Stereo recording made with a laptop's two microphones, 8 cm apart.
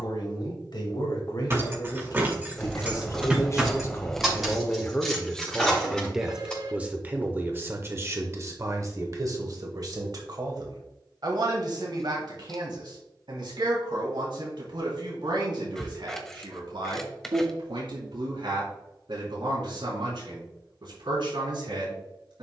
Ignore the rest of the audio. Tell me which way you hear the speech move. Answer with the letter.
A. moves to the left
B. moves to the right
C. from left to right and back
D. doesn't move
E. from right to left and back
B.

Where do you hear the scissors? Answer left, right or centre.
centre.